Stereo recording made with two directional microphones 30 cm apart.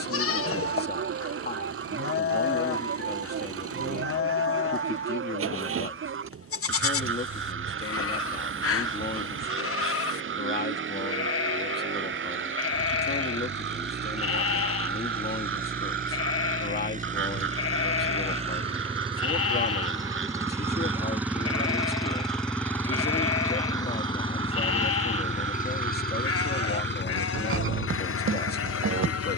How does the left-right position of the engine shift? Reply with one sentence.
You can hear the engine travel towards the left.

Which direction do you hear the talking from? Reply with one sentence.
You can hear the talking on the left.